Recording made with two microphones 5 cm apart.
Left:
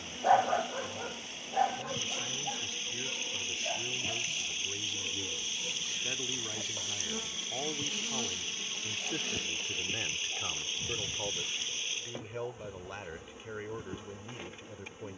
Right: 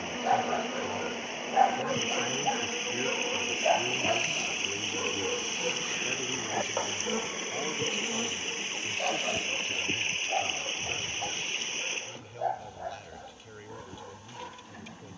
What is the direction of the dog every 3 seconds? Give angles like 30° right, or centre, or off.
20° right, 60° right, 70° right, 80° right, 80° right.